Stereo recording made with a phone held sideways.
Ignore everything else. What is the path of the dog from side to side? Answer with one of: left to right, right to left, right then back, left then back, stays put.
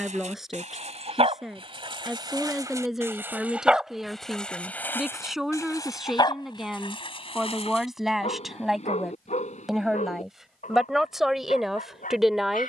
right to left.